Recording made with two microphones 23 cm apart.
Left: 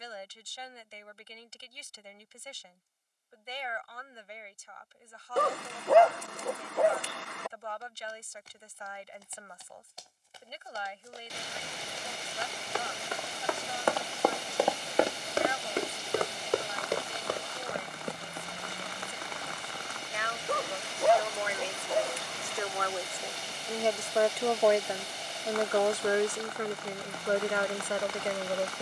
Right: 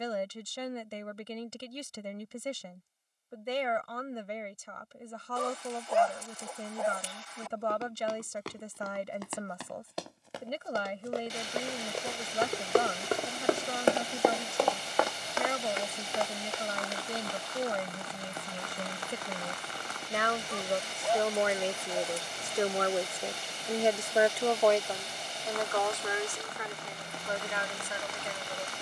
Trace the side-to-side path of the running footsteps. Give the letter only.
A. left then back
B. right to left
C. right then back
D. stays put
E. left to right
B.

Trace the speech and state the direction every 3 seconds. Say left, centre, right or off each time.
right, right, right, right, right, right, right, right, left, left.